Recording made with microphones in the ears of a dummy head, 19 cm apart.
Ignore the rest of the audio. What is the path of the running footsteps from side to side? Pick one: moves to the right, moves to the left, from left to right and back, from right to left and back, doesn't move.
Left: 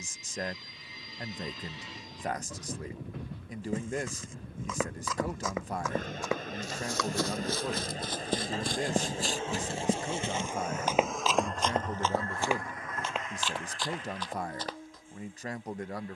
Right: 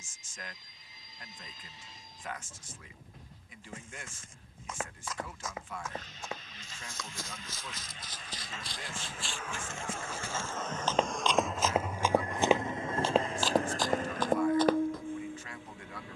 moves to the right.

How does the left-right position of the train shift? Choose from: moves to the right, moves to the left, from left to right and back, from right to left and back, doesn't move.
moves to the right.